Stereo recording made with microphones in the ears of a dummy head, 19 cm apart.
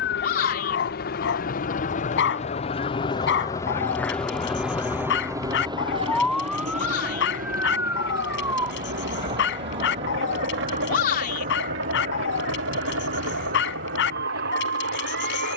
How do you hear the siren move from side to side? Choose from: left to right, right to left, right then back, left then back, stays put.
left to right.